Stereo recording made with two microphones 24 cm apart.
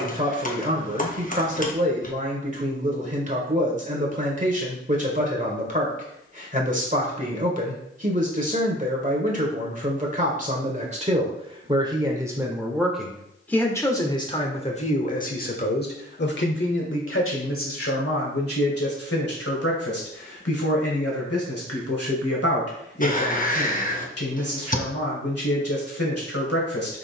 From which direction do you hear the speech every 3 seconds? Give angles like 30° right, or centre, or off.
30° right, 30° right, 30° right, 30° right, 10° left, 50° left, 70° left, 70° left, 70° left.